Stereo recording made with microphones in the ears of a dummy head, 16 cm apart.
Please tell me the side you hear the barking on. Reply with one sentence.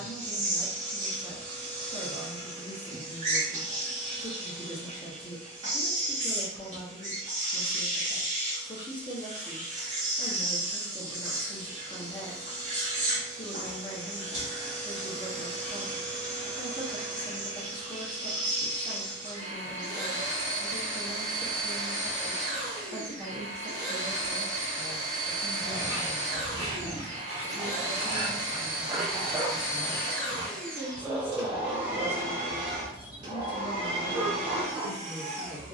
You can hear the barking on the right.